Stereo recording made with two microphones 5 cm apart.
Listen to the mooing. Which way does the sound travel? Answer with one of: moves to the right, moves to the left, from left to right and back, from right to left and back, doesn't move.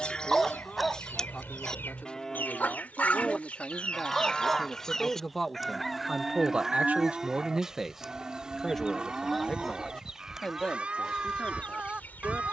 moves to the right.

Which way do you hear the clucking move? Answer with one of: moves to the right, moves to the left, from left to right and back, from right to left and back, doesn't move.
from left to right and back.